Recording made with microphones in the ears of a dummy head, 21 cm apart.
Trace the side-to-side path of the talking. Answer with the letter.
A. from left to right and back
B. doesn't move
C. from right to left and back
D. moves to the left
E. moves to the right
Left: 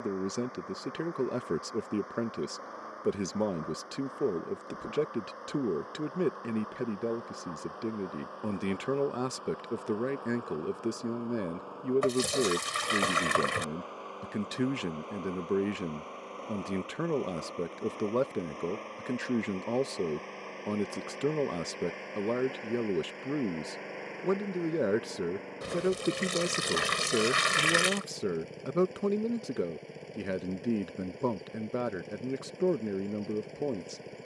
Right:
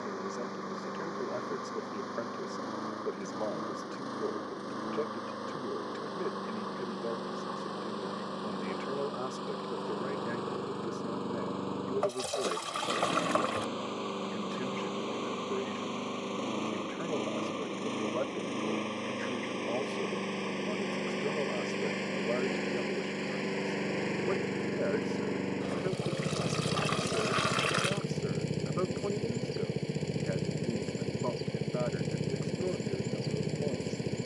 B.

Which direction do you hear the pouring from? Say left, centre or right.
left.